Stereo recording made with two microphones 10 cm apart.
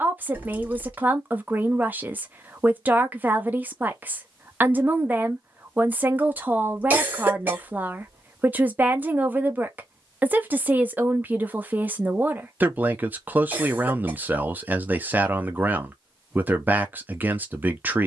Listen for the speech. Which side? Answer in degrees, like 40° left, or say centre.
20° right.